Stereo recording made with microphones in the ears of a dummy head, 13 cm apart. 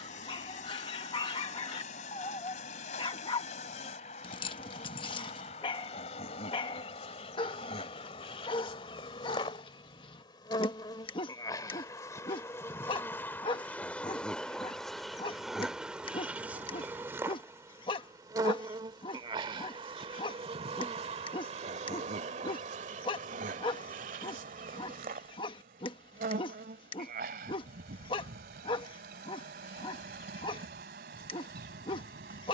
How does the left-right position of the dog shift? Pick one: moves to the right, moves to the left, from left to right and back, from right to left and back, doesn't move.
doesn't move.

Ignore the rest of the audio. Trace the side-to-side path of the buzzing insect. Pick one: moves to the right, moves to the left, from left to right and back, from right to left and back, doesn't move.
moves to the right.